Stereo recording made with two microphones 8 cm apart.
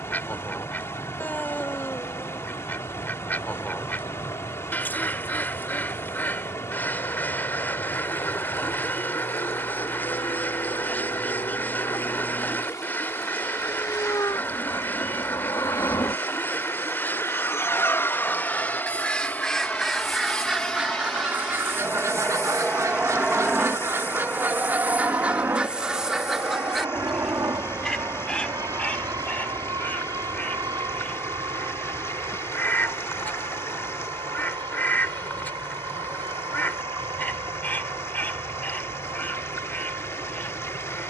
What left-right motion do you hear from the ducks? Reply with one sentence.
You can hear the ducks move from left to right and back again.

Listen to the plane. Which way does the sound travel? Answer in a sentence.
You can hear the plane move from left to right.